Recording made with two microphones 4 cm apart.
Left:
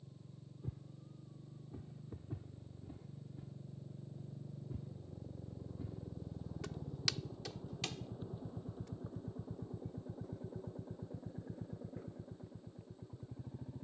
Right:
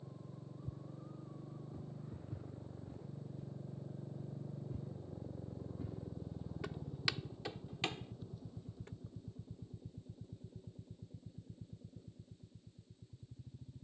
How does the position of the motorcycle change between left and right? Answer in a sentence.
You can hear the motorcycle move from right to left.